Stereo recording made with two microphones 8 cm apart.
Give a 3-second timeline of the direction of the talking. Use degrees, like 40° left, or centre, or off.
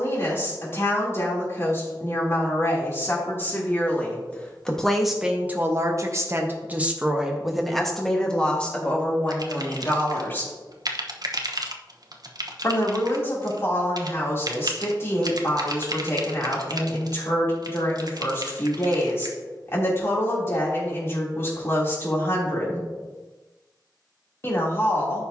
30° left, centre, 10° right, 20° left, 30° left, 30° left, 30° left, 30° left, 30° left.